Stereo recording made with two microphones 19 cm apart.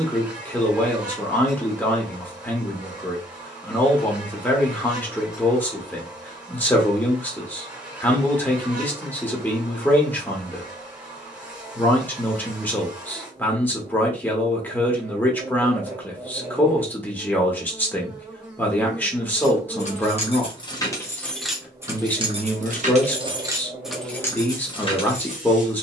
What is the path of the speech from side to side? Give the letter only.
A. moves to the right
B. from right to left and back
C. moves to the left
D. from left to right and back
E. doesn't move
E.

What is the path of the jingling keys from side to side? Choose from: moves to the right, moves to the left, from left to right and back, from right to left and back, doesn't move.
from left to right and back.